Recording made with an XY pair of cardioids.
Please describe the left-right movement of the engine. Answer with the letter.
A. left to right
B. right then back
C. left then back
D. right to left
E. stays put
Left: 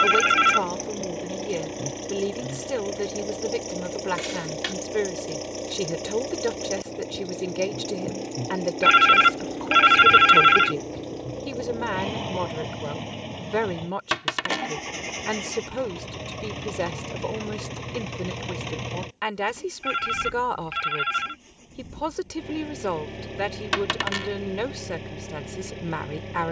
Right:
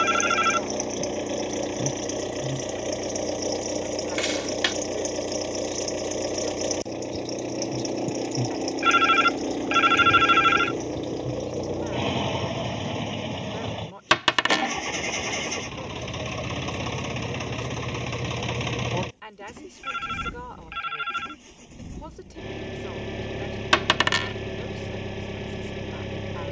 E.